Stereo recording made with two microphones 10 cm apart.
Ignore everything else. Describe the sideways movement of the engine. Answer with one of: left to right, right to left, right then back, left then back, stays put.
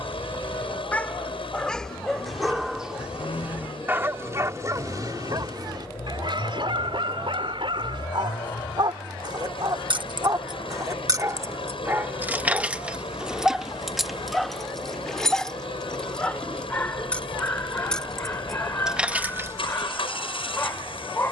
stays put.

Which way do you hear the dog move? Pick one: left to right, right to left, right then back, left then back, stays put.
right then back.